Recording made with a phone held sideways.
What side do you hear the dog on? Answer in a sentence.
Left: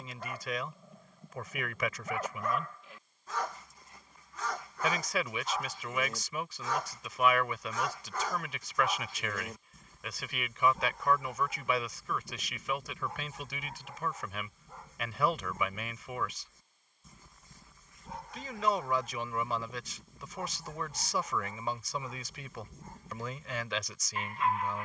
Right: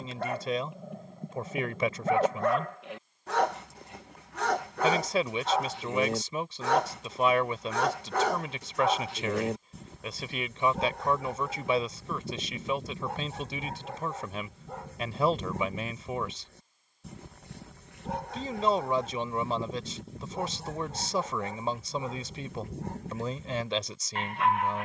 You can hear the dog on the right.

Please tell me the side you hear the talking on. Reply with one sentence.
You can hear the talking on the right.